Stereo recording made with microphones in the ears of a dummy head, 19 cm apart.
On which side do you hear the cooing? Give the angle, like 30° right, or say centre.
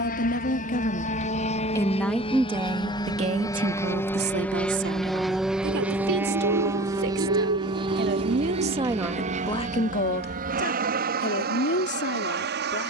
70° right.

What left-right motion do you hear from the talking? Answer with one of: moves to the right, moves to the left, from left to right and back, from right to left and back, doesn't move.
from left to right and back.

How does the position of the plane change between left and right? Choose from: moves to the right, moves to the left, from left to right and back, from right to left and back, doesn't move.
moves to the right.